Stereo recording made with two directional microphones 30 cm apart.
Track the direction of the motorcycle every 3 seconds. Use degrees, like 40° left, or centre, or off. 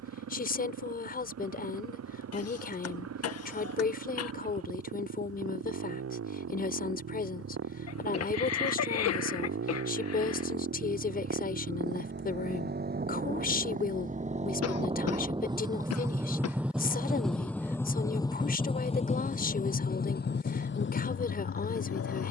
60° right, 50° right, 50° right, 40° right, 30° right, 10° right, 20° left, 40° left.